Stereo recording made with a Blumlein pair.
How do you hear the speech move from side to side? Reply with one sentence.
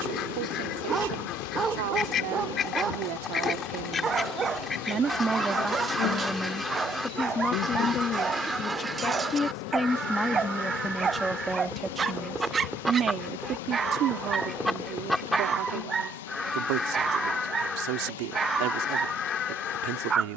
You can hear the speech go left and come back.